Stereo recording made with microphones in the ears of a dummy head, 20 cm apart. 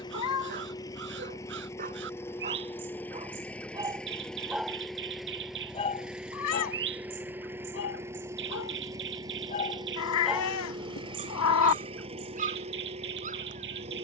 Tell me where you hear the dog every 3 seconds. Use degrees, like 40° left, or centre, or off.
40° right, 10° right, 60° left, 10° right, 40° right.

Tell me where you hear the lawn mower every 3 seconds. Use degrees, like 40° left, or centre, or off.
10° left, centre, 10° right, 20° right, 30° right.